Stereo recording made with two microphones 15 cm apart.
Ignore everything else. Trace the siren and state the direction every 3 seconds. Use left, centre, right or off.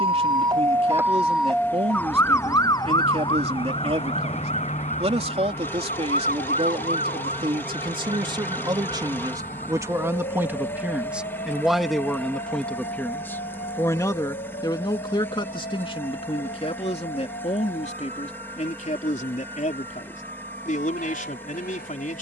centre, left, left, left, left, left, left, left.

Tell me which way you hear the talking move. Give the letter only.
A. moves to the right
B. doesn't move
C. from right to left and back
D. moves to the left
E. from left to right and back
D.